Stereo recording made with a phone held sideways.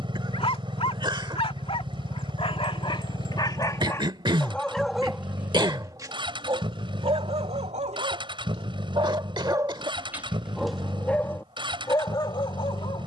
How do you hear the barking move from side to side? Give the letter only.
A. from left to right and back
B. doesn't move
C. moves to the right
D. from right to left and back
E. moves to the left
A.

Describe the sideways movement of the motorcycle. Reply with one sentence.
You can hear the motorcycle stay put.